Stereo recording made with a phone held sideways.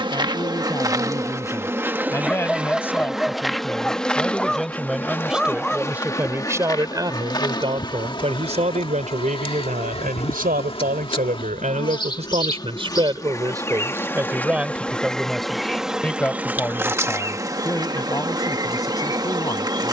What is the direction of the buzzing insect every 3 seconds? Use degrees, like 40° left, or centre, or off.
20° right, 10° left, 30° left, 30° left, 20° left, 10° right, 20° right.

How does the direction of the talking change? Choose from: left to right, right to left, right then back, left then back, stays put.
right then back.